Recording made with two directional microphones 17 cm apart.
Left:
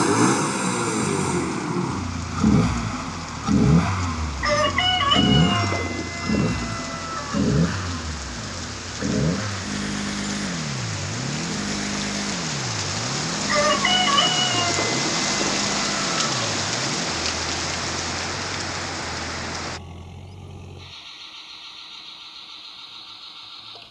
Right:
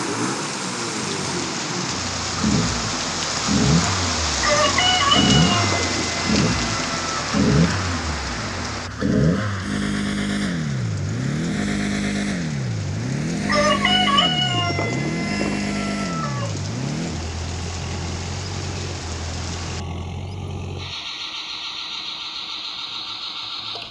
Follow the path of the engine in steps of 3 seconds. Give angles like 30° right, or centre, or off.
30° left, 10° left, 10° right, 30° right, 40° right, 40° right, 50° right, 50° right.